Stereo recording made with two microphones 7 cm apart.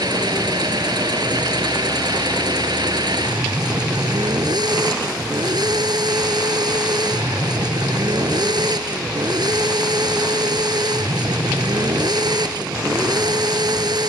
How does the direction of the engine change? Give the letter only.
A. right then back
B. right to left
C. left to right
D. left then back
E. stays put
E.